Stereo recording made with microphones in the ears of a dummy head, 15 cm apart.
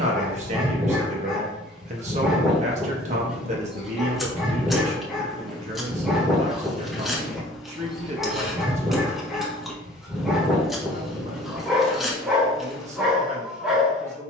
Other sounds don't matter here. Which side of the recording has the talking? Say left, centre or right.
right.